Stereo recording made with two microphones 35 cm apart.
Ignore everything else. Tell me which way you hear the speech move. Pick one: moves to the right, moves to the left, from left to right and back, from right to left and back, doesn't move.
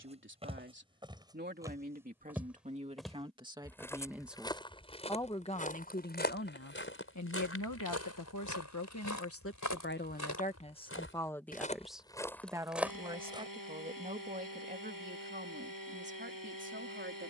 from right to left and back.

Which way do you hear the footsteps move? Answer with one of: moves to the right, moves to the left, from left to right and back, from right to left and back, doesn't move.
from right to left and back.